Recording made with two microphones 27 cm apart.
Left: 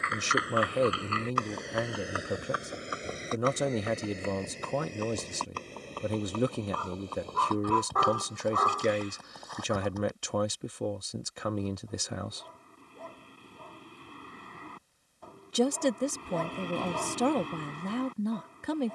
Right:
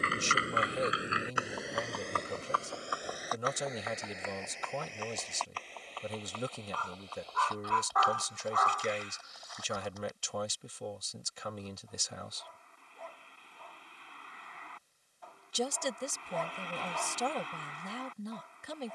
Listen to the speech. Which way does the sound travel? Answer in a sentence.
In this clip you hear the speech stay in one place.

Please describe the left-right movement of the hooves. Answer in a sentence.
In this clip you hear the hooves move from right to left.